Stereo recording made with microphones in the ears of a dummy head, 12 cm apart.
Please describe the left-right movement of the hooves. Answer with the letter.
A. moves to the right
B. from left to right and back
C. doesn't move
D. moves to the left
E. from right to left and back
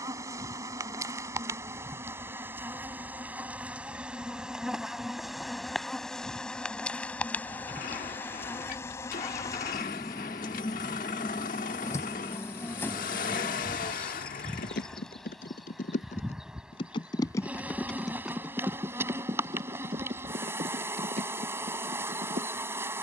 A.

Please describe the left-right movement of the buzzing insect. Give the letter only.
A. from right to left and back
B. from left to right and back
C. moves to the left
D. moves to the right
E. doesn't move
A.